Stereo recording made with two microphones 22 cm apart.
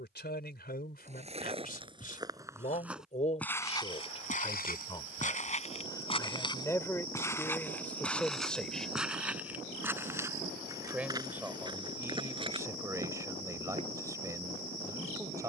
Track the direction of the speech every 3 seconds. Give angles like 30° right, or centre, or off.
40° left, 20° left, 10° left, 10° right, 10° right.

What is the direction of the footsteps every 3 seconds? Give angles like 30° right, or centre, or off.
20° right, 30° left, 10° left, 10° right, 20° right.